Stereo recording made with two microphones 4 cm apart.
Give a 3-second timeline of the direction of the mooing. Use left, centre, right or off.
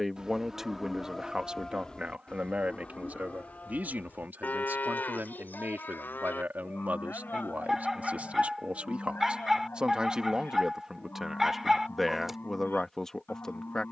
centre, left, left, left, left.